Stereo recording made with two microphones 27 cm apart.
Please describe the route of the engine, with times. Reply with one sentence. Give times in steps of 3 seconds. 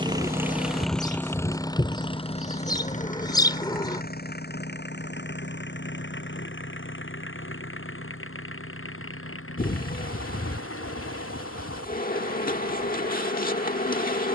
You can hear the engine in the centre from 0 s and on the left from 3 s.